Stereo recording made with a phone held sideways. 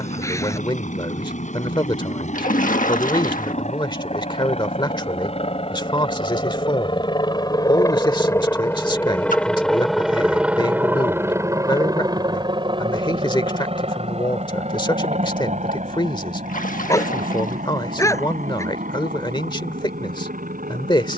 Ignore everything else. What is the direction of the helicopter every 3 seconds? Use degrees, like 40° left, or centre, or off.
60° left, 50° left, 30° left, 10° right, 40° right, 60° right, 70° right.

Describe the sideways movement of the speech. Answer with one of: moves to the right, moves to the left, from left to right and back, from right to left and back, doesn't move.
doesn't move.